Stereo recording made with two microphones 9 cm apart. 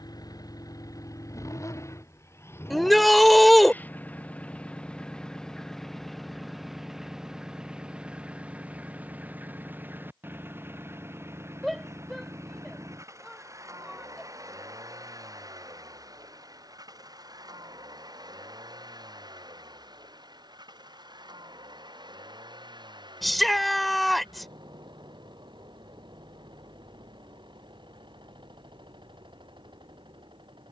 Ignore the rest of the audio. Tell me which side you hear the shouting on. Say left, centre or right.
centre.